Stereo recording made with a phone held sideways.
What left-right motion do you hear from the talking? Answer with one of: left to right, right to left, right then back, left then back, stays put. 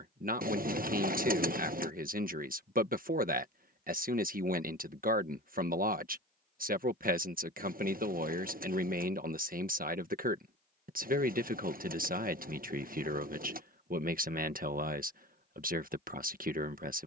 stays put.